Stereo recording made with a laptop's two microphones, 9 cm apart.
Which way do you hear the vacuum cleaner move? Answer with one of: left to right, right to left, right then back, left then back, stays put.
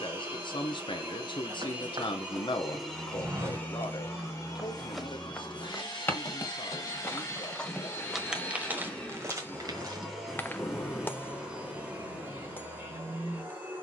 left then back.